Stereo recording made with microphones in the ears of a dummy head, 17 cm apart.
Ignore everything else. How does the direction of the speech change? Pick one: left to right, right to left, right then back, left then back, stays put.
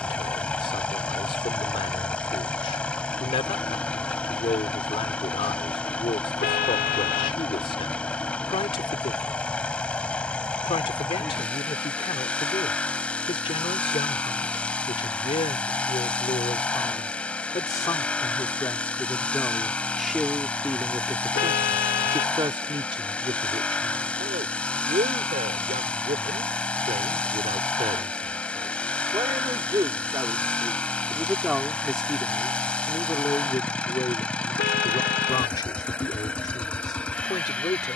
right then back.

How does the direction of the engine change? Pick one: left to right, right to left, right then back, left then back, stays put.
stays put.